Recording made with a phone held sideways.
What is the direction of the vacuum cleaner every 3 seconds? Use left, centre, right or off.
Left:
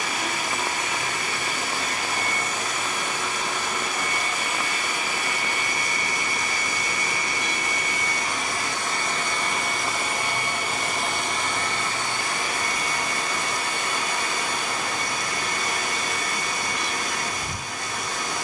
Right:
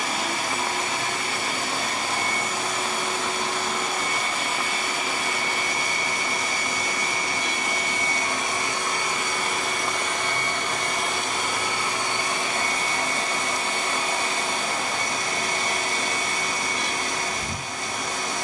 right, right, right, centre, right, right.